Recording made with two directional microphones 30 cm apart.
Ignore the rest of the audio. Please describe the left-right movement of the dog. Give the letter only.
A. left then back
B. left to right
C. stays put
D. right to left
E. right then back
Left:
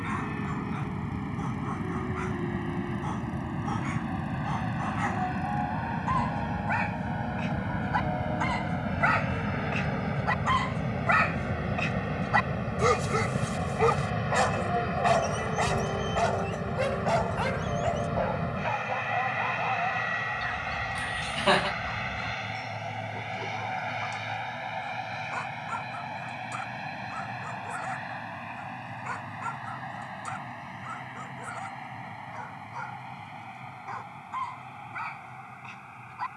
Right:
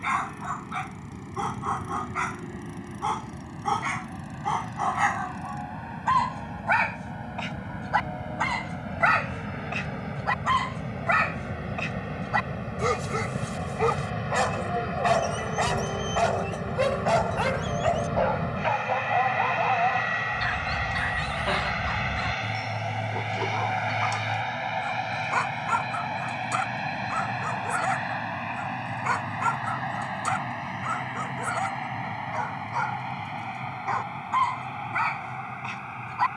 A.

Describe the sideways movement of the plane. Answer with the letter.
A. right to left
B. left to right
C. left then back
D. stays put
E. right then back
B.